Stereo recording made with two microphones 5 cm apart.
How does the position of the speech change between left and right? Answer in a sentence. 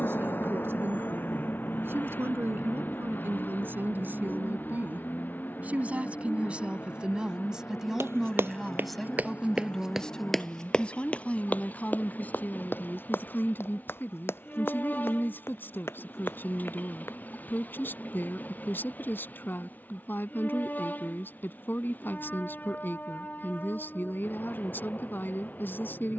You can hear the speech move from right to left.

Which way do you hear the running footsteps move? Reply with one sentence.
In this clip you hear the running footsteps go from the right side to the left.